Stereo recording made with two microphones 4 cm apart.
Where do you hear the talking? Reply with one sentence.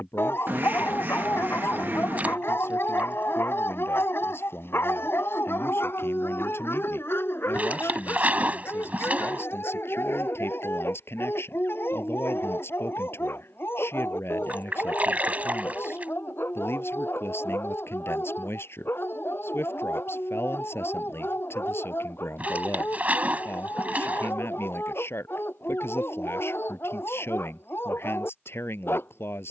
You can hear the talking on the left.